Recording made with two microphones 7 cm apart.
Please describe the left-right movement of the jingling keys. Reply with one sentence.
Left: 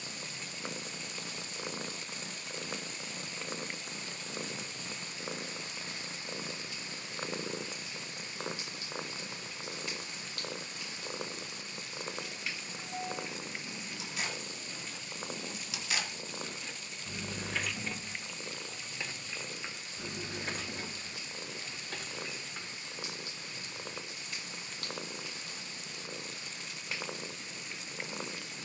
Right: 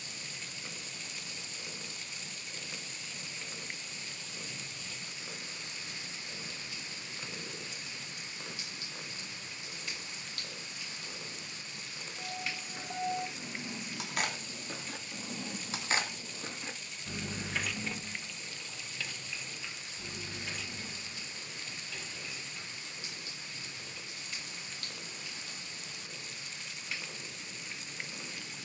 In this clip you hear the jingling keys move from right to left.